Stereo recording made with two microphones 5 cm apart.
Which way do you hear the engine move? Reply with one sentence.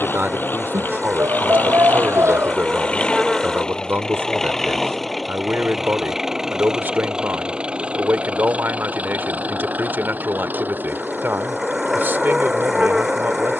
In this clip you hear the engine move from left to right.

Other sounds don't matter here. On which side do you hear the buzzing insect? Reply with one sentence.
You can hear the buzzing insect in the centre.